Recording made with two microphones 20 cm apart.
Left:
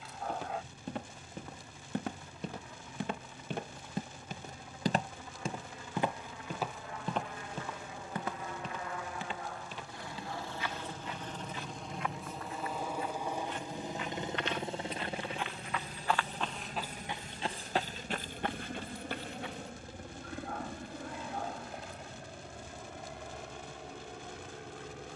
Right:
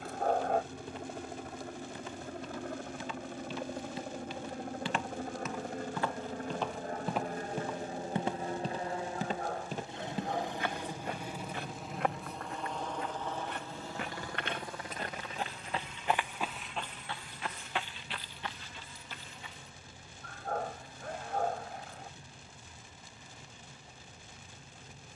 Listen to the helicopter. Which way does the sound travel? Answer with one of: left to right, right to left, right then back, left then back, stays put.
right to left.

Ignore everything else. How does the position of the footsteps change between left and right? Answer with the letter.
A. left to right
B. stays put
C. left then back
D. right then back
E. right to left
D.